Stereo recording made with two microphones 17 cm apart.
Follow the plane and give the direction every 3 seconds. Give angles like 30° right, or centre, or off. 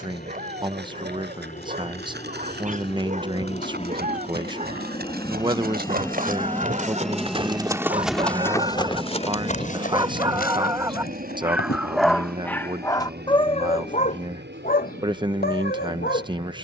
50° left, 40° left, centre, 40° right, 60° right, 70° right.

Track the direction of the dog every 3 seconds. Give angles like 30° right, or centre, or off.
50° right, 50° right, 40° right, 20° right, 30° left, 70° left.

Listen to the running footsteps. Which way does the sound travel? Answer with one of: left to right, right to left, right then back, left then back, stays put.
right to left.